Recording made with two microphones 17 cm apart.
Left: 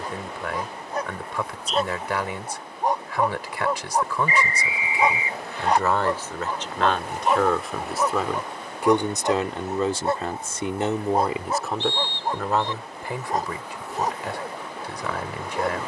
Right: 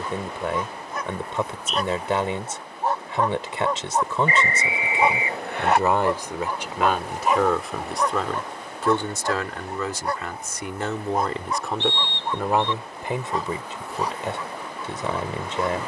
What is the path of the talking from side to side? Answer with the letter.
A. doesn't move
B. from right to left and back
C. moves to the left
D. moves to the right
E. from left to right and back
B.